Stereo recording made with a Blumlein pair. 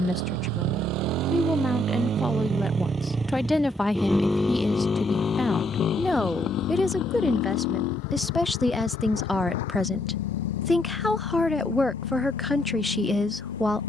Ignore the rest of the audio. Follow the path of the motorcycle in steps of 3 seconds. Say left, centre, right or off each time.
right, centre, left, left, left.